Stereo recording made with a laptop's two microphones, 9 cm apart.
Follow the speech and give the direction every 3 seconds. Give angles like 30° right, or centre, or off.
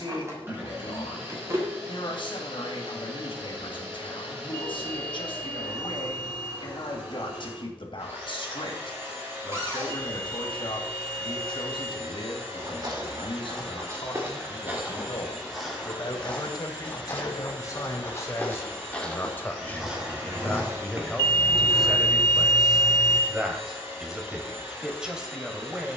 60° left, 60° left, 60° left, 60° left, 60° left, 40° left, 20° left, centre, 10° right.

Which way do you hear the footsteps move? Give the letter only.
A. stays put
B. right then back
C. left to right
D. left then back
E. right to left
D.